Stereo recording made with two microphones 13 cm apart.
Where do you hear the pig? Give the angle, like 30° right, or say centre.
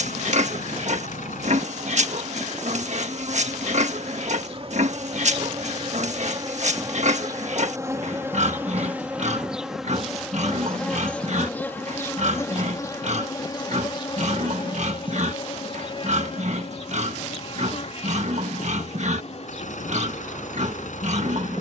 60° right.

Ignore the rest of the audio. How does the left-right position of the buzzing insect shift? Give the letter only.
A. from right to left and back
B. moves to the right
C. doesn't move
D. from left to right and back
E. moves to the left
E.